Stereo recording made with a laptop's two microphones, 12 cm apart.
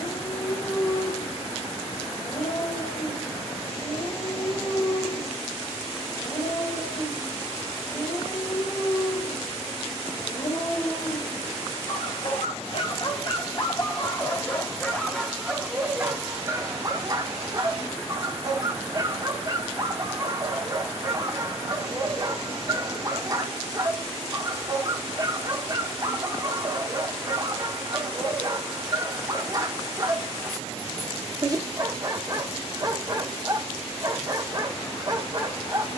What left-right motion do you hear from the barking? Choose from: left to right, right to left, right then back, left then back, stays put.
left to right.